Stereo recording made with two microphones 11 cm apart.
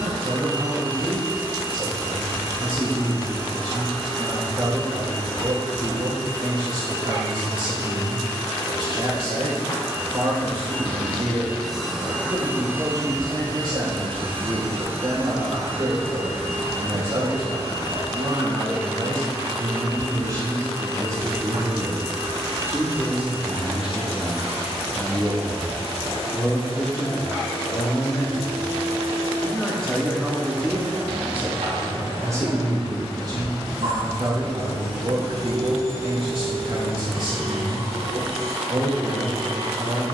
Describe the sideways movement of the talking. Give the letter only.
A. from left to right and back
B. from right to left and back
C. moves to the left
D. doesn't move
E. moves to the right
B.